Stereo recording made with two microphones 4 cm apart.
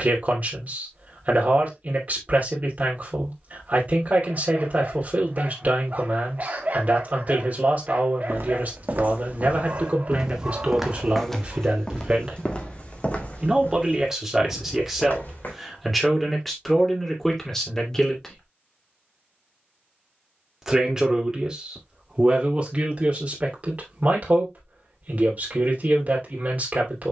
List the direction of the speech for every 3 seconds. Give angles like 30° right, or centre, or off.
40° right, 40° right, 40° right, 30° right, 10° right, centre, centre, 30° right, 40° right.